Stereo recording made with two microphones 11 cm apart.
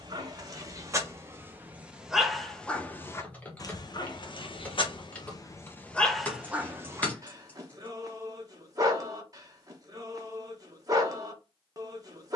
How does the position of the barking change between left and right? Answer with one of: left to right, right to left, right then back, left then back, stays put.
left then back.